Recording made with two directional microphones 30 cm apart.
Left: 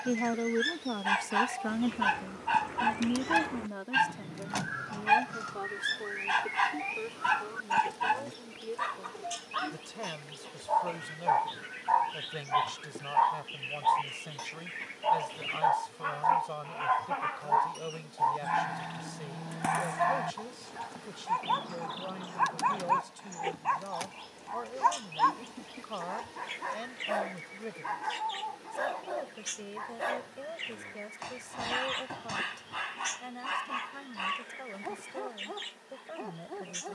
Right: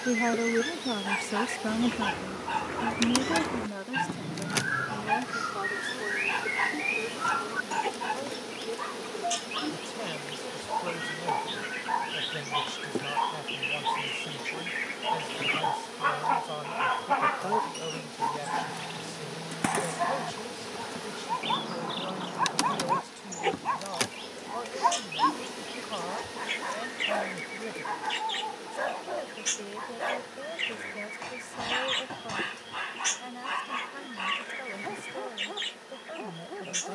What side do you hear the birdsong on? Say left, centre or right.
right.